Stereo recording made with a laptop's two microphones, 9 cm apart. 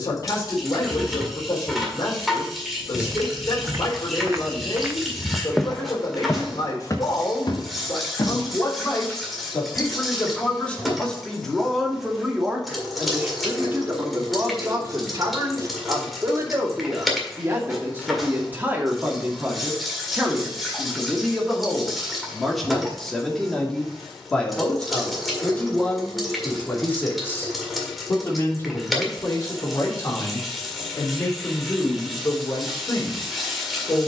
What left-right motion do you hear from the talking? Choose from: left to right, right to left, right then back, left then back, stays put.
right then back.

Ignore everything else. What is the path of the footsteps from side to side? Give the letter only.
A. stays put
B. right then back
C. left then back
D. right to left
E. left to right
D.